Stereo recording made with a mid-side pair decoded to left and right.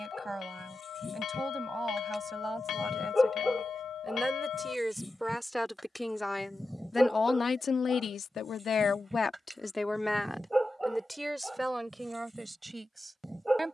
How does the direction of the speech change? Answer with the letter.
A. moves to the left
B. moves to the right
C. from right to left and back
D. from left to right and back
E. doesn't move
C.